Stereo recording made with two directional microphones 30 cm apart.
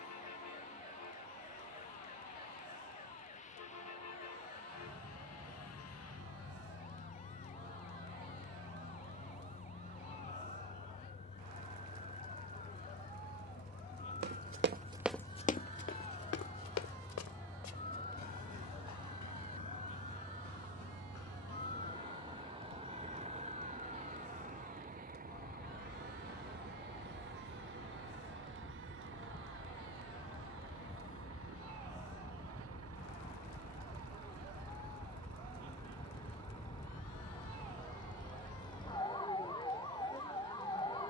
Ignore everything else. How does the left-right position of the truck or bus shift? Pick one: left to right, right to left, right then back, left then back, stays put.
left to right.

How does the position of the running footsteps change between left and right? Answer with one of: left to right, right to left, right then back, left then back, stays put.
right to left.